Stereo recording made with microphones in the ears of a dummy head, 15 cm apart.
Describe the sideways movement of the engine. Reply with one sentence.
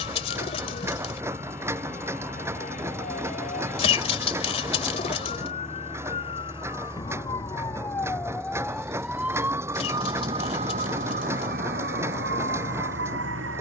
In this clip you hear the engine stay in one place.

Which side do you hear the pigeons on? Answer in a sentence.
In this clip you hear the pigeons on the left.